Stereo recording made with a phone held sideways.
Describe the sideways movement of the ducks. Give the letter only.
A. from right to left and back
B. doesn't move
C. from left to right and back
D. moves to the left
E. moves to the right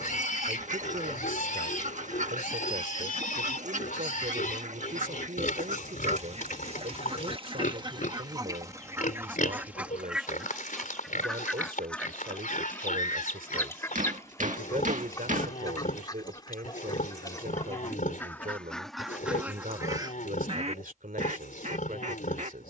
A.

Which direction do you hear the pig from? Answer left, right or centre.
left.